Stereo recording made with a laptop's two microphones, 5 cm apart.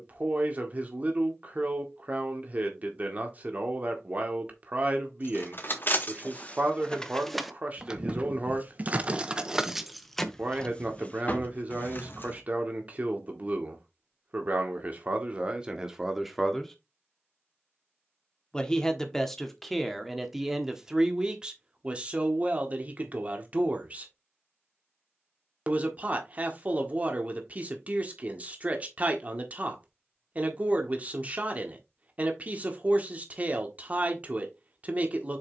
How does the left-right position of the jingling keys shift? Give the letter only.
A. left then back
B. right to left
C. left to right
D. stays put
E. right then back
E.